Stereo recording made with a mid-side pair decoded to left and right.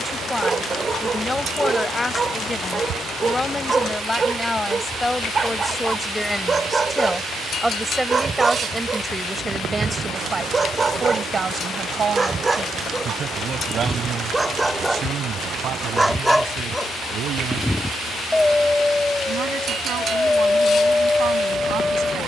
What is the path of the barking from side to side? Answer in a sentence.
You can hear the barking travel towards the left.